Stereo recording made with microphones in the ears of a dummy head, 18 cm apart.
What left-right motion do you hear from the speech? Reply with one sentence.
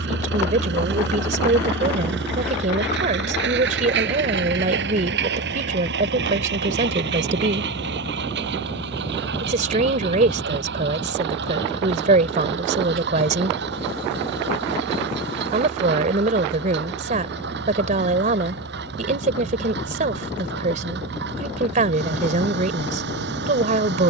In this clip you hear the speech stay put.